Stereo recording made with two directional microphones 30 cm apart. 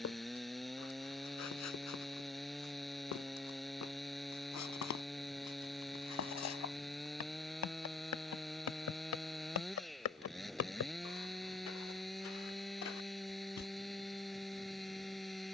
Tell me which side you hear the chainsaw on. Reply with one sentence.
In this clip you hear the chainsaw in the centre.